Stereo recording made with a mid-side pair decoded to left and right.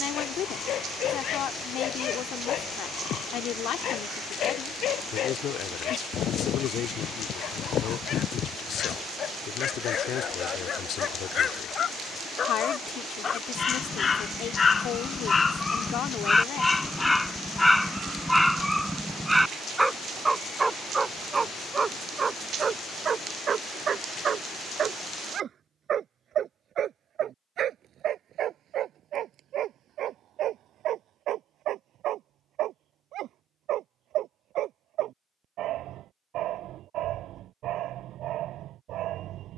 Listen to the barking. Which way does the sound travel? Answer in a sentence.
You can hear the barking move from left to right.